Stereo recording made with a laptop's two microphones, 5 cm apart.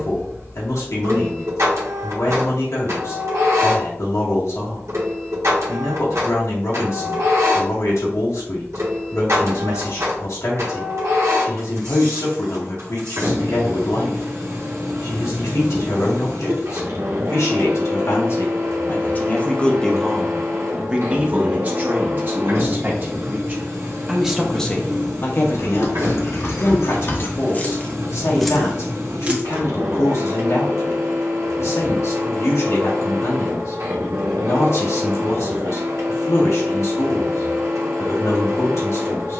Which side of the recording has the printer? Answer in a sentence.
In this clip you hear the printer on the right.